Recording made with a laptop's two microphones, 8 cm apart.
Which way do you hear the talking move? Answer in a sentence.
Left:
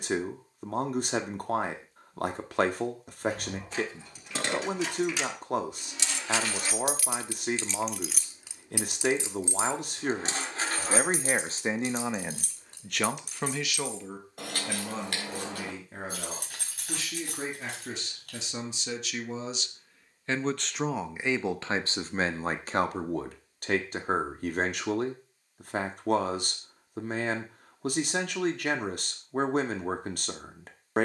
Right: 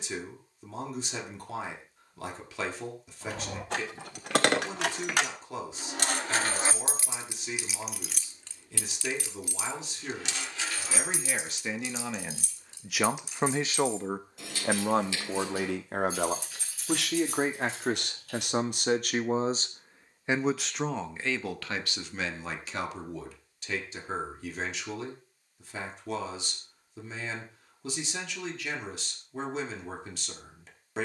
You can hear the talking go right and come back.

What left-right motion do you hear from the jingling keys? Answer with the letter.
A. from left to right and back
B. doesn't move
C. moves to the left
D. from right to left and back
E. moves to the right
C.